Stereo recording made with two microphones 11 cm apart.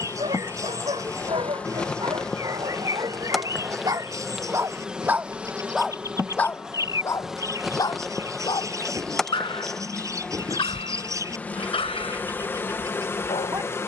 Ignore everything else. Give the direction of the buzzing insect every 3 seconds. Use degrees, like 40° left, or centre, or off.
10° left, 10° right, centre, 10° left, 20° left.